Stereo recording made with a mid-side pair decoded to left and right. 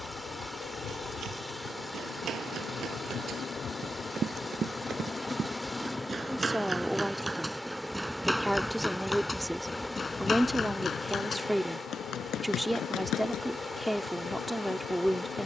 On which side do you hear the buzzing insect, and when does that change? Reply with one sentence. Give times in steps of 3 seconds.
You can hear the buzzing insect on the left from 0 s, in the centre from 6 s and on the left from 9 s.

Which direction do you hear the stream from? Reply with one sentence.
You can hear the stream in the centre.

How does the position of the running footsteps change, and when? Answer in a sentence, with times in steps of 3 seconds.
In this clip you hear the running footsteps on the right from 0 s, in the centre from 6 s and on the left from 9 s.